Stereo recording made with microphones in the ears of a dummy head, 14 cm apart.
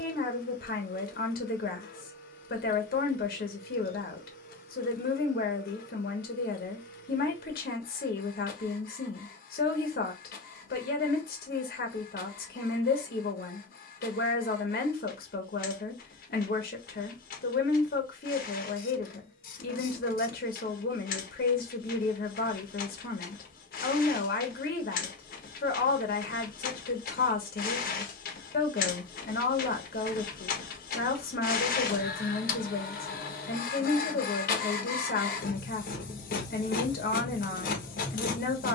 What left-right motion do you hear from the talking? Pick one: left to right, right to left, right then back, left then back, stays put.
stays put.